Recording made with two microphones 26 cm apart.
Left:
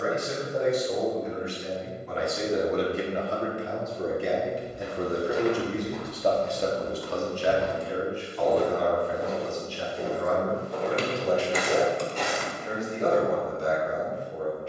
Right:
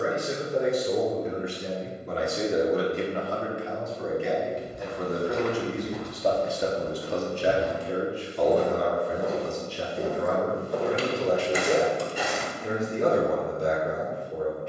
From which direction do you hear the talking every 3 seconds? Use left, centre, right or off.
right, left, right, right, right.